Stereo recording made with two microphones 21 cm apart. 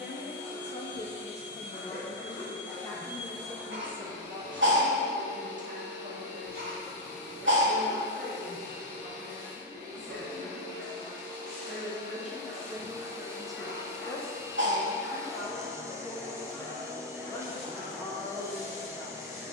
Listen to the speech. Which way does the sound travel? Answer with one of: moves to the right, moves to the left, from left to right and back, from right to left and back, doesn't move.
from left to right and back.